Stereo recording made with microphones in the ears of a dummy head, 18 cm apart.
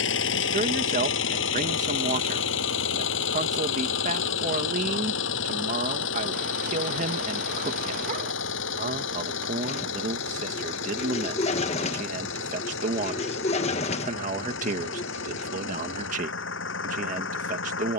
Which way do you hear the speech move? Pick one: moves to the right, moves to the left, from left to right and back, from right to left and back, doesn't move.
doesn't move.